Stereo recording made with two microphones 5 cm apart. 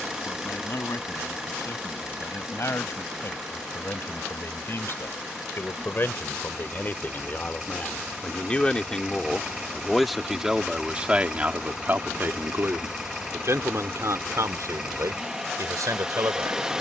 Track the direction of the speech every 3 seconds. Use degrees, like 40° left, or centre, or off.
50° left, 50° left, 30° left, 10° right, 60° right, 80° right.